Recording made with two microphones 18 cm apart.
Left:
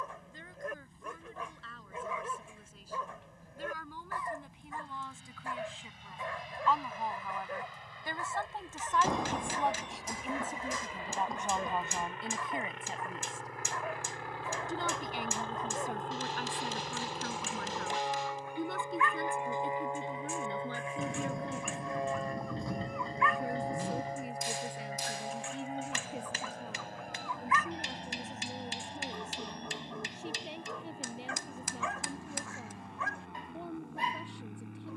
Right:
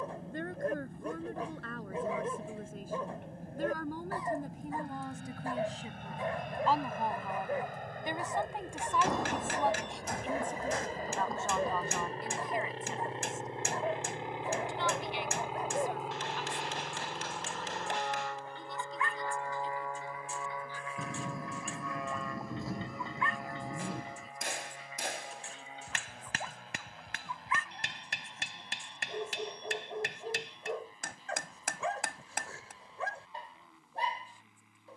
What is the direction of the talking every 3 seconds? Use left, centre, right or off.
right, right, right, centre, left, left, left, left, left, left, left, left.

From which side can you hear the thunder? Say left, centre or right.
centre.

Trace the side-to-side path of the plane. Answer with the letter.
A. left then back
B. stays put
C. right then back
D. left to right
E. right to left
E.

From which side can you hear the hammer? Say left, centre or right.
right.